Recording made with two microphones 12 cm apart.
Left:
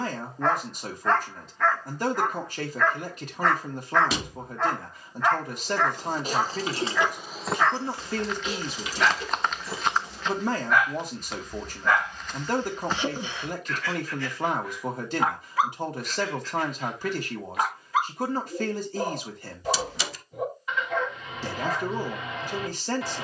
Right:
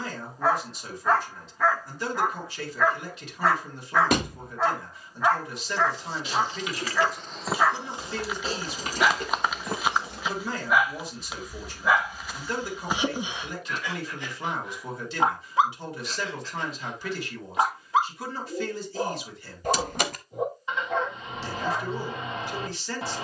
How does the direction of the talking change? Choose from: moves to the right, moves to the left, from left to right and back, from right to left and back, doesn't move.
doesn't move.